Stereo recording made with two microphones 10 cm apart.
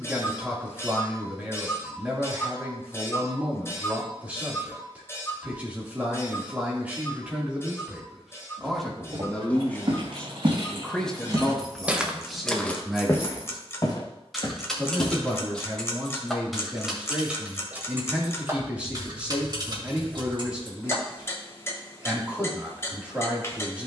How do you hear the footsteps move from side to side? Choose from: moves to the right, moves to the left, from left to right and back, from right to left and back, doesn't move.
moves to the left.